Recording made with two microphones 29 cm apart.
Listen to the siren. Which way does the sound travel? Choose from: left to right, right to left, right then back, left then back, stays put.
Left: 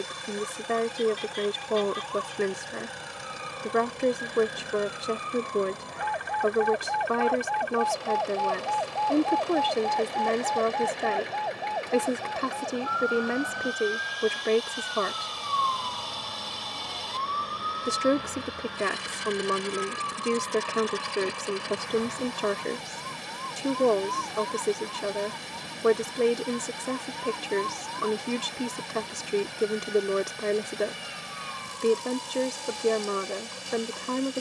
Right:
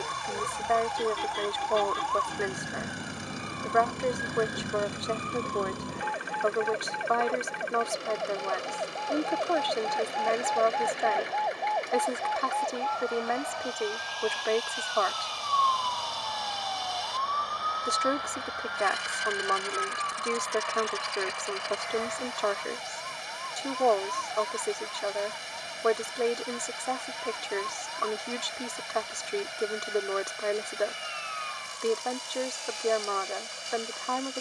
right to left.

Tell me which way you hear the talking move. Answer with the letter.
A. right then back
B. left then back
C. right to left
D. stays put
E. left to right
D.